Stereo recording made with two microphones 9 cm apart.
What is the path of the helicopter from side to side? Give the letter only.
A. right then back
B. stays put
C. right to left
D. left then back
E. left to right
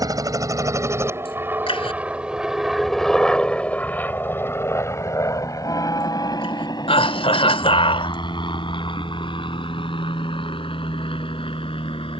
C.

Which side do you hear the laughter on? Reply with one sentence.
You can hear the laughter on the left.